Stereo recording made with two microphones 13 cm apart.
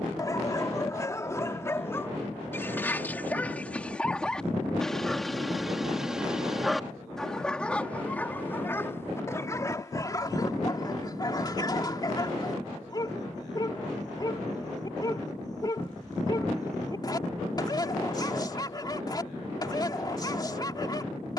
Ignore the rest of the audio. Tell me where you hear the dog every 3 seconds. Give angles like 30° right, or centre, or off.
20° left, 10° left, 10° left, 30° left, 30° left, 30° left, 30° left.